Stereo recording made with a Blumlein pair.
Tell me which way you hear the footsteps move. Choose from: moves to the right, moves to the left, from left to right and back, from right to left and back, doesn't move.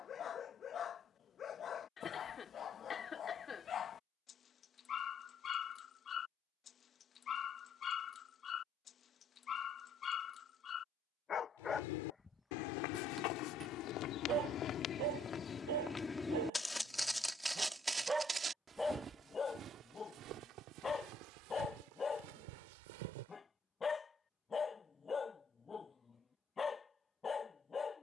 moves to the right.